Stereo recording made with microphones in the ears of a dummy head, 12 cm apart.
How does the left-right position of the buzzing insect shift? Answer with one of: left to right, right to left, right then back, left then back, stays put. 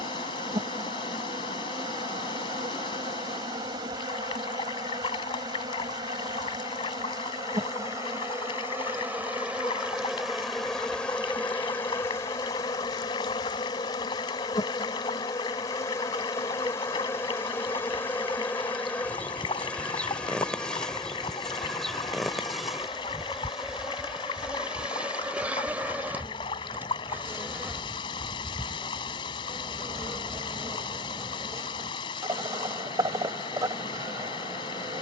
left then back.